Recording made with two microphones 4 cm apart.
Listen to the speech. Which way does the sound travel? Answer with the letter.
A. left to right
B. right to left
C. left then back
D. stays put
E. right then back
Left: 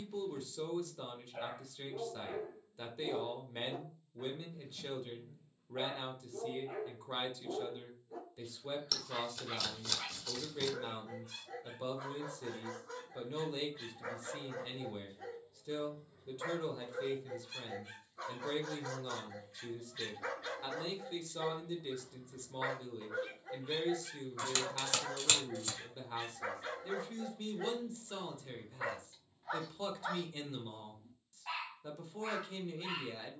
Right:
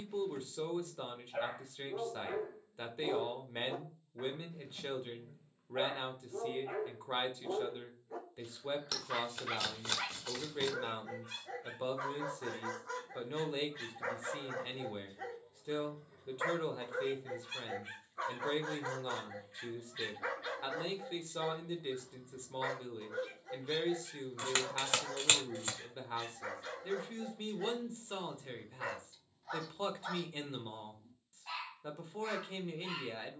D.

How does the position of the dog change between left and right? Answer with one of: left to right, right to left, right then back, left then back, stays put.
right to left.